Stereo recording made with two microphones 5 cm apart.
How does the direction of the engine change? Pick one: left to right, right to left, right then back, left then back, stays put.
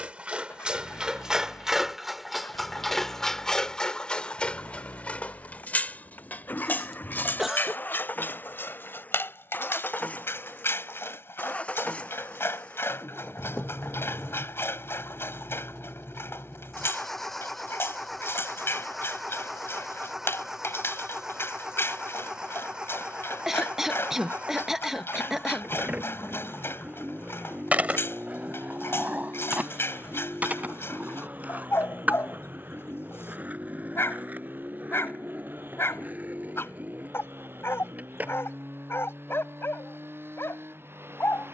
left to right.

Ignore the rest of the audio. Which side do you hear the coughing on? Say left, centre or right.
centre.